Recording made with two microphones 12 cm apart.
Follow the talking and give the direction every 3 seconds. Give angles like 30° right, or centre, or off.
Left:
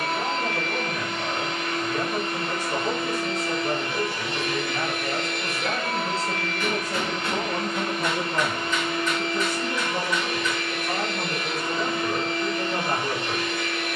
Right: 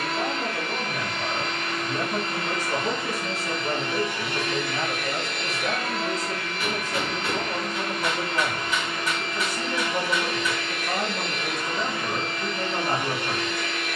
20° right, 10° left, 50° left, centre, 20° right.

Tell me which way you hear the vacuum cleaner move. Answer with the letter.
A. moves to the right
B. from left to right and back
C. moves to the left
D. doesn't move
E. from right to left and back
D.